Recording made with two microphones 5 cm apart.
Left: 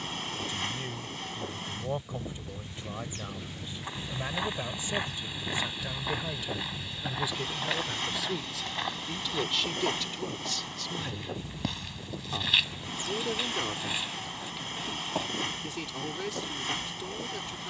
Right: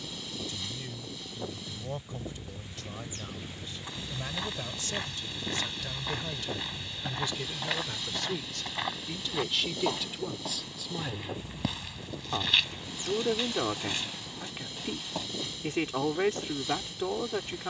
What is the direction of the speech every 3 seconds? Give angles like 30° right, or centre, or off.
20° left, 20° left, 10° left, 10° right, 30° right, 40° right.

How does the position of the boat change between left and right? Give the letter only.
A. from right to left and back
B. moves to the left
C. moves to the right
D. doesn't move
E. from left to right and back
D.